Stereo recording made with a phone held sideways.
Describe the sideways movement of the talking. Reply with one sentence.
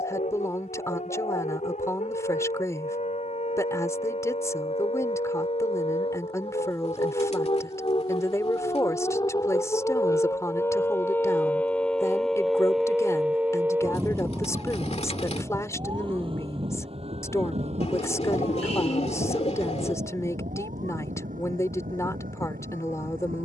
You can hear the talking stay in one place.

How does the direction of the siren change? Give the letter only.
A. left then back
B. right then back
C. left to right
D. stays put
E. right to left
C.